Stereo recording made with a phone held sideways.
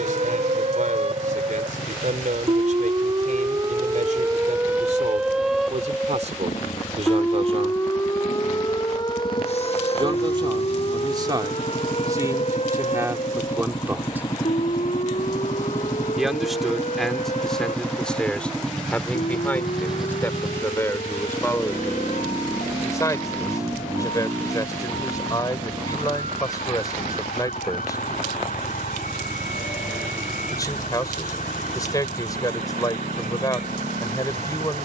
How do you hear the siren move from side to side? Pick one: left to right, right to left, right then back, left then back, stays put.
right to left.